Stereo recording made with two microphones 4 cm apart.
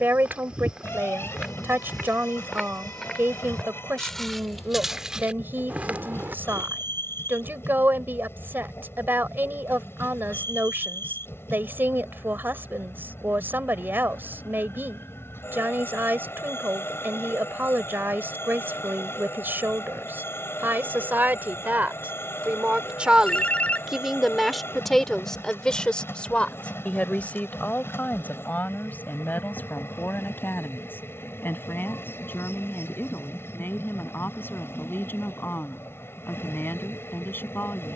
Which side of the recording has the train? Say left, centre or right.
left.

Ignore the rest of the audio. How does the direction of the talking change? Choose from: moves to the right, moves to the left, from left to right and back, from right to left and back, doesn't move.
moves to the left.